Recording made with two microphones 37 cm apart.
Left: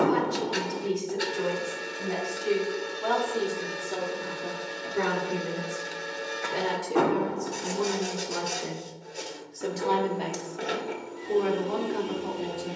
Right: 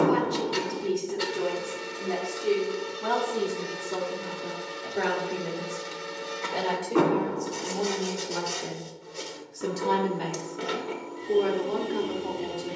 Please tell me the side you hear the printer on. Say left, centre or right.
centre.